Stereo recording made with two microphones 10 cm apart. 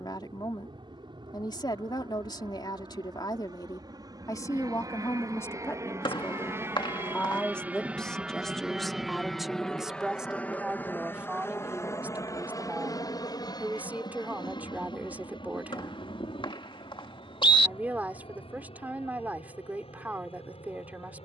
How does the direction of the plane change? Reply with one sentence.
You can hear the plane travel towards the left.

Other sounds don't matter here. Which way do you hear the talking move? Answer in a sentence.
You can hear the talking move to the right.